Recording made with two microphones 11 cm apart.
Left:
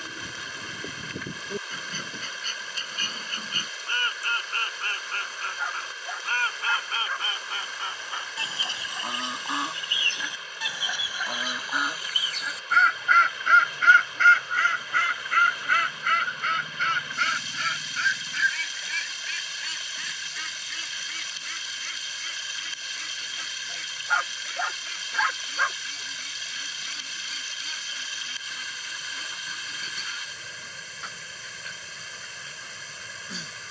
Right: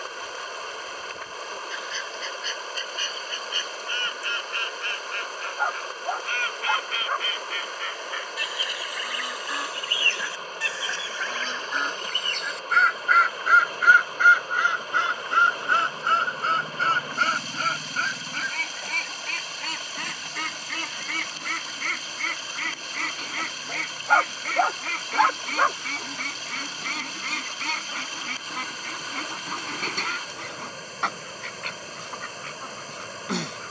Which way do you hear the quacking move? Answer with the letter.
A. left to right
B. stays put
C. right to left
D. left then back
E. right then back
A.